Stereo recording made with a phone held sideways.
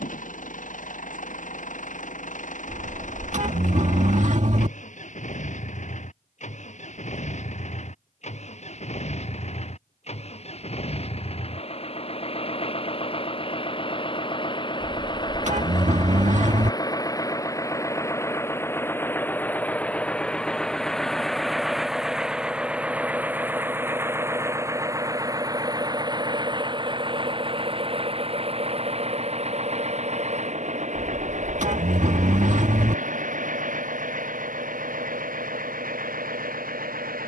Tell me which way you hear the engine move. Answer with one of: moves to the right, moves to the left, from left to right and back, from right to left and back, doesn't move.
moves to the right.